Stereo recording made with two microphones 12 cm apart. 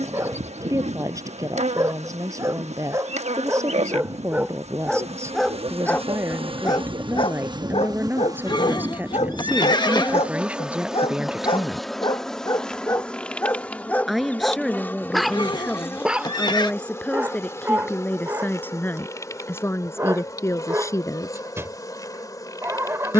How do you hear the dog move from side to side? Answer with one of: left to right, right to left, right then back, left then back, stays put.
left then back.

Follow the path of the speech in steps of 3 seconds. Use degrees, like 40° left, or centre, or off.
30° right, 20° right, 20° right, 10° right, centre, 10° left, 20° left, 30° left.